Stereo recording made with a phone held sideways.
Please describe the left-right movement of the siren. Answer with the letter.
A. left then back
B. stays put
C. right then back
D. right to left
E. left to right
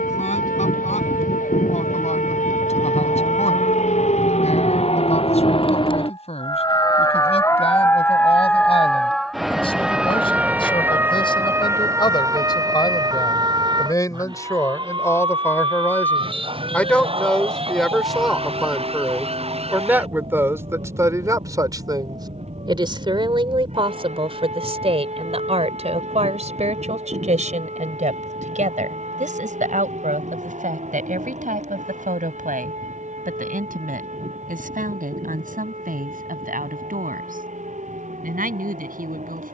E.